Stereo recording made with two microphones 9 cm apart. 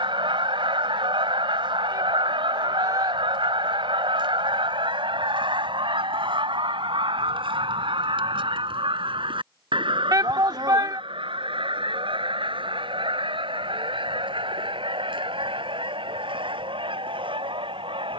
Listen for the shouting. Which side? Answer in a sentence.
In this clip you hear the shouting on the right.